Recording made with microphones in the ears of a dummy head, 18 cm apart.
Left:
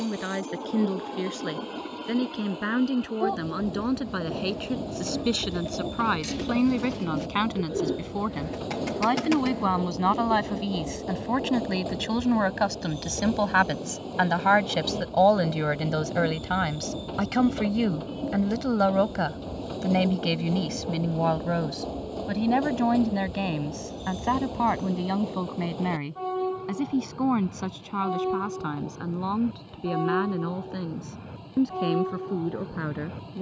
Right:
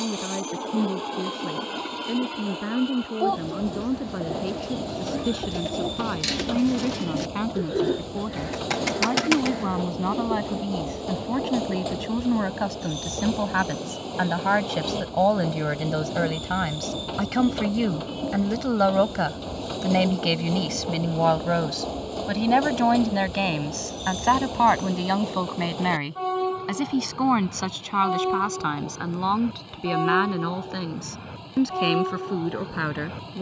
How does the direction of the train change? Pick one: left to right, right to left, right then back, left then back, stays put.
stays put.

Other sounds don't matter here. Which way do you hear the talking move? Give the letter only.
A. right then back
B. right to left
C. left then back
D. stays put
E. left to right
E.